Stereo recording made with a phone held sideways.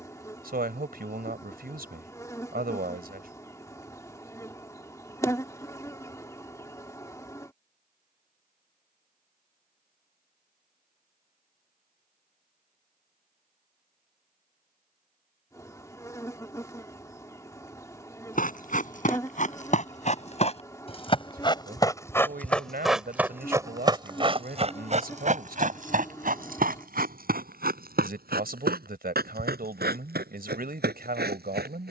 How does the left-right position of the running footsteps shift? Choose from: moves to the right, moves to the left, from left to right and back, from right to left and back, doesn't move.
moves to the right.